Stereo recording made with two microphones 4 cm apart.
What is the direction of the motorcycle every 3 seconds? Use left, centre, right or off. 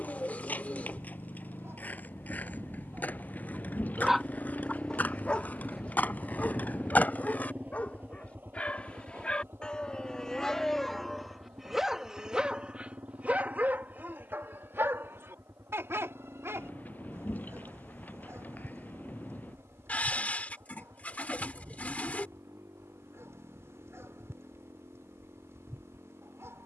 left, left, right, right, right, right, right, right, right.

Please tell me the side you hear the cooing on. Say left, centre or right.
left.